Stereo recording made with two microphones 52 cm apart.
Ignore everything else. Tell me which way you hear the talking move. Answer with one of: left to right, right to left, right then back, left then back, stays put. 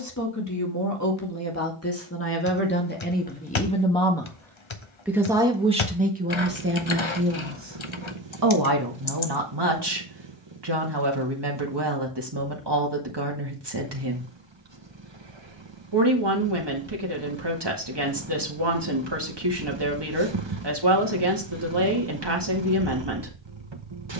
left to right.